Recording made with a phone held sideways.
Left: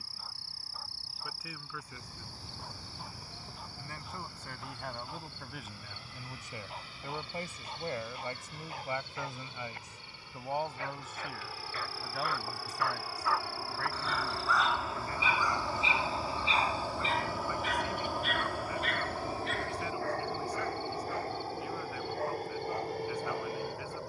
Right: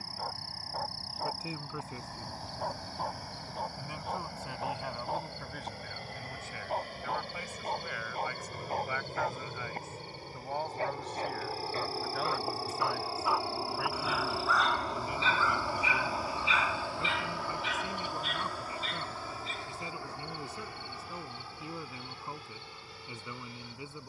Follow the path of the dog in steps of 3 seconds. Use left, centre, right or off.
right, right, right, right, centre, left, left, left.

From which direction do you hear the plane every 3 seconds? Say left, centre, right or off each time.
right, right, right, right, right, centre, left, left.